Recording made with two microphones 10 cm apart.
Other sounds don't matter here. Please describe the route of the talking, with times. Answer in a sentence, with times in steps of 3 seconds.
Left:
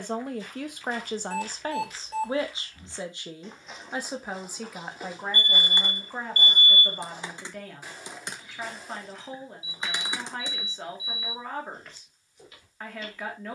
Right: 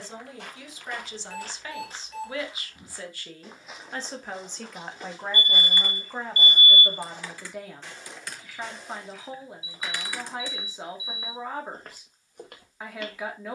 You can hear the talking on the left from 0 s and in the centre from 3 s.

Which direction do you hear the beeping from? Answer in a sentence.
In this clip you hear the beeping on the left.